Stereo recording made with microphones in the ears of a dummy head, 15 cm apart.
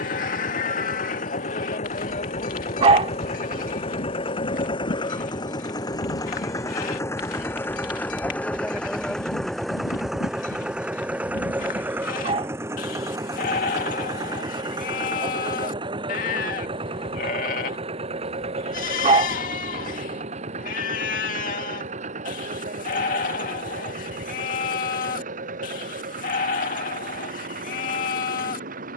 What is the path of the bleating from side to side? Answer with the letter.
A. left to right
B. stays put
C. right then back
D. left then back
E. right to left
B.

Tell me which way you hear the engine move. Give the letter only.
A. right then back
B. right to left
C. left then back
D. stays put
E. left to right
E.